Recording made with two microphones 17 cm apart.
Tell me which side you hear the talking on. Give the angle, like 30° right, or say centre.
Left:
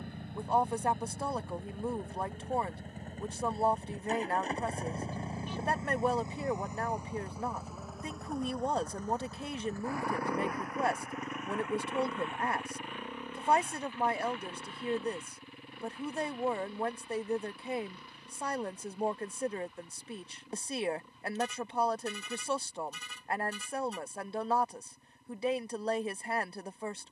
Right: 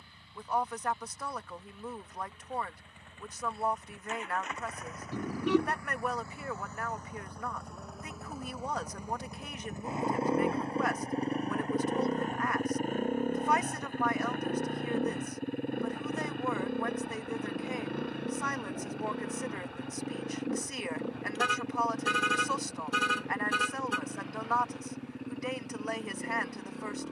30° left.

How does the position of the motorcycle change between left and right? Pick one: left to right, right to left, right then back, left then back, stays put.
left to right.